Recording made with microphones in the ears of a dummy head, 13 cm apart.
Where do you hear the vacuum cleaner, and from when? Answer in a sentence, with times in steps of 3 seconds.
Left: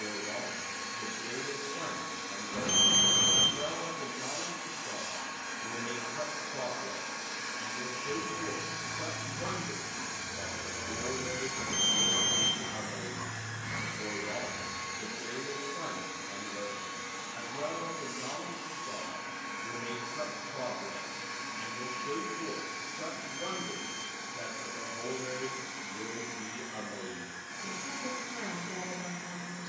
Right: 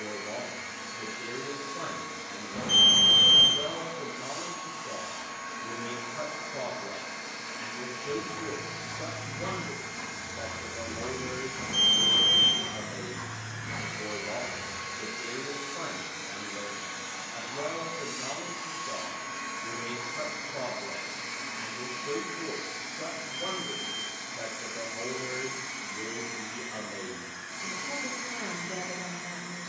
In this clip you hear the vacuum cleaner on the left from 0 s, in the centre from 12 s and on the right from 15 s.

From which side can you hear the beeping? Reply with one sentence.
In this clip you hear the beeping on the left.